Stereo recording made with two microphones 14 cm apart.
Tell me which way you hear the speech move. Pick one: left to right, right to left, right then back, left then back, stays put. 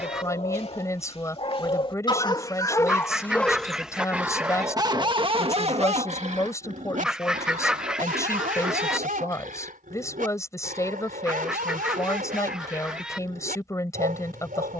stays put.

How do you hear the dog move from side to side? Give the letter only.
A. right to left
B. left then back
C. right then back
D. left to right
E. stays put
D.